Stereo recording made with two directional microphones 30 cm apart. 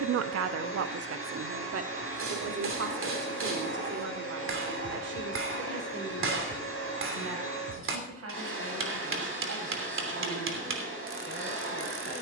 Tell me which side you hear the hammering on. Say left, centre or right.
right.